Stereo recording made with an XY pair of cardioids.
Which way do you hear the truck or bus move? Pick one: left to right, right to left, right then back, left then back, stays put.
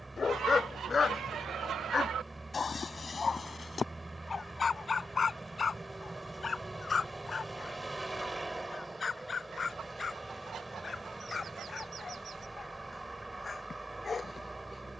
stays put.